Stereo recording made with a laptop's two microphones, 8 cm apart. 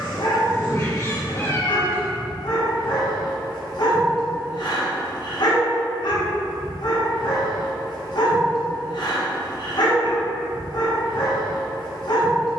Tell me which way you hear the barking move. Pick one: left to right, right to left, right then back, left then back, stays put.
stays put.